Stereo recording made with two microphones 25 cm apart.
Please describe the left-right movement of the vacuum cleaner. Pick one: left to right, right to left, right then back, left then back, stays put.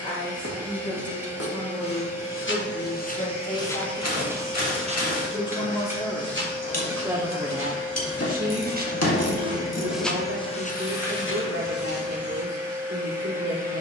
stays put.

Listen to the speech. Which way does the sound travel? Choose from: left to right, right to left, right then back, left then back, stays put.
left to right.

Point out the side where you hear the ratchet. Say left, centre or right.
left.